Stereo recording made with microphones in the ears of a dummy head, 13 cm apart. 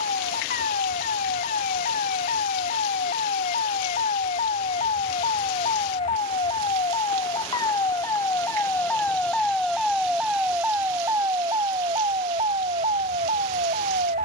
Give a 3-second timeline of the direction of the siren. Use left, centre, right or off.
left, left, left, centre, right.